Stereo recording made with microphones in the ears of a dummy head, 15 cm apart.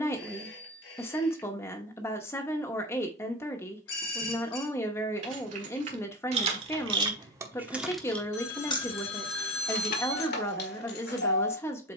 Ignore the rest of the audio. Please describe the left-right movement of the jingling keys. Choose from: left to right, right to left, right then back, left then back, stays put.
right to left.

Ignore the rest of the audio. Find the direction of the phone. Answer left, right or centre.
left.